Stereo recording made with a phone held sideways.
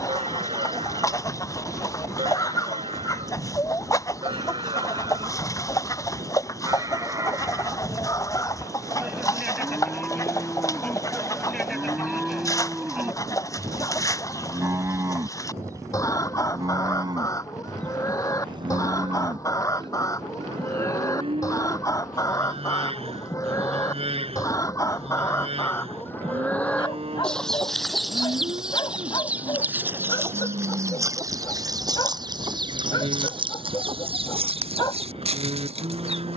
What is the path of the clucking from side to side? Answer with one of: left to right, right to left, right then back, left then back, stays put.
left to right.